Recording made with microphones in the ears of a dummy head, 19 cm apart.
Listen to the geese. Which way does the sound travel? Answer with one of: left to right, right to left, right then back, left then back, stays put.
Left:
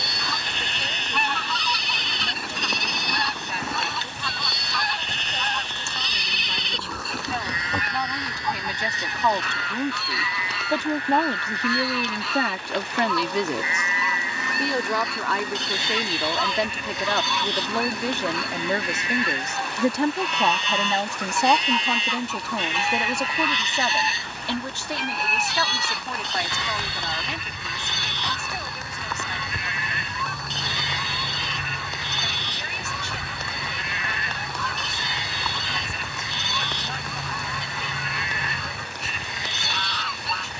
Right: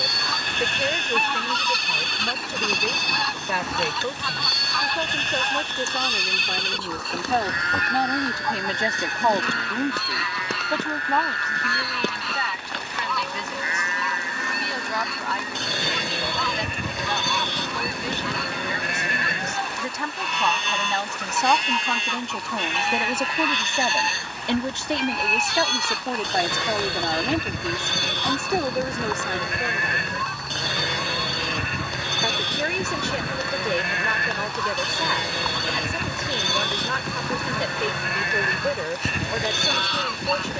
stays put.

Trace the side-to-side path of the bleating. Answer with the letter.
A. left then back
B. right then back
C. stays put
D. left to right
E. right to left
C.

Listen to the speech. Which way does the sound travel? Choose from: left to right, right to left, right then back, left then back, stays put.
left then back.